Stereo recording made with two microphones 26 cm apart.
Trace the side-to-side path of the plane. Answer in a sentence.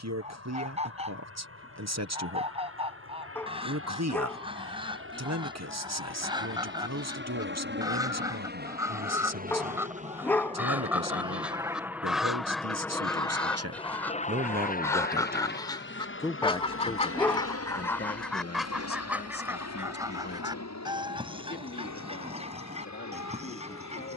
You can hear the plane go from the right side to the left.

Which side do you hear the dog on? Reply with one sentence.
You can hear the dog in the centre.